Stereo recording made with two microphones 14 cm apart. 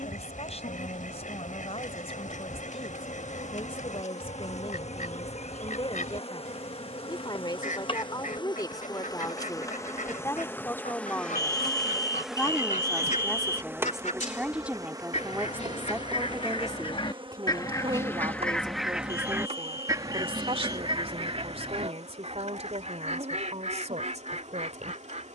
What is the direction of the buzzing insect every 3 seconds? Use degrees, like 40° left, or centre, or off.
70° left, 60° left, 40° left, 20° left, 10° right, 40° right, 50° right, 60° right, 60° right.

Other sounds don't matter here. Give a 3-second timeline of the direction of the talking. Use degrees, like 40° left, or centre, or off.
50° left, 40° left, 30° left, 20° left, centre, 20° right, 40° right, 50° right, 60° right.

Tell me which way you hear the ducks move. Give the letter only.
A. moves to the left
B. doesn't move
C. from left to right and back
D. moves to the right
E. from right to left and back
D.